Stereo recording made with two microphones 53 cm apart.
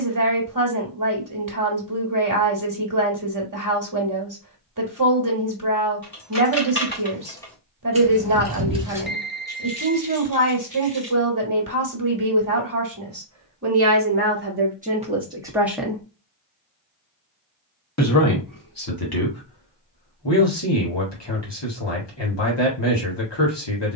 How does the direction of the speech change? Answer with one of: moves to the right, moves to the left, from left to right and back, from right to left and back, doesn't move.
moves to the left.